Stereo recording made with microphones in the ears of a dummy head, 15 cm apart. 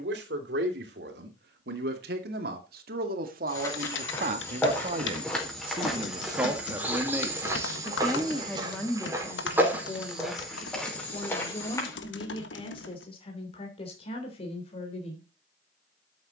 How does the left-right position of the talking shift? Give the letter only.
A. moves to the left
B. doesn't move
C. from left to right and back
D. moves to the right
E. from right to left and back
A.